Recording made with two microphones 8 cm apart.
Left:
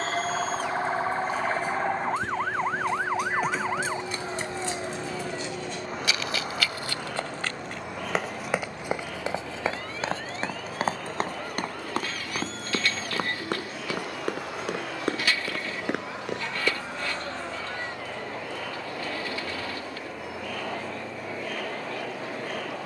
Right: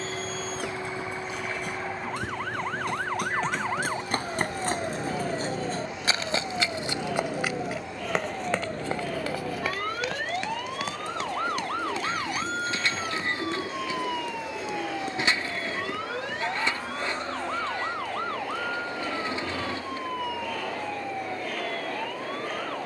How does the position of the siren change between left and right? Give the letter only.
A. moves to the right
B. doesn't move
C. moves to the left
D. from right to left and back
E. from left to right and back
A.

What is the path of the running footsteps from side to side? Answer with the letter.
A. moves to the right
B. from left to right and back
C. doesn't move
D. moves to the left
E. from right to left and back
D.